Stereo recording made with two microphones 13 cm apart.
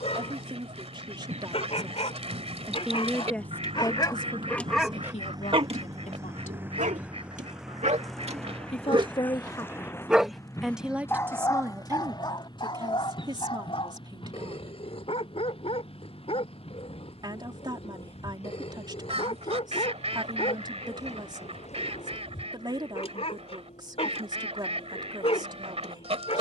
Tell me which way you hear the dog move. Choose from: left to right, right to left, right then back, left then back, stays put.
right then back.